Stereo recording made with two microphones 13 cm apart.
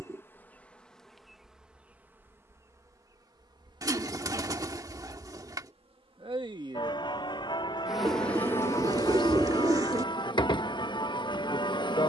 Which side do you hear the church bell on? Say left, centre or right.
left.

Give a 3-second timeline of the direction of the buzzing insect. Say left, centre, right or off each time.
centre, right, centre, left.